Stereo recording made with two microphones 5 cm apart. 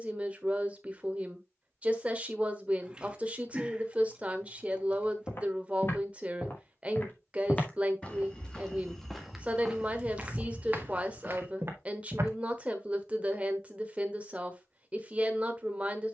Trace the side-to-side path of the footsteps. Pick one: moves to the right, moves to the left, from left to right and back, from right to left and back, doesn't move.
moves to the right.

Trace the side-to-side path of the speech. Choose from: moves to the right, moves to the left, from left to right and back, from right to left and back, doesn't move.
doesn't move.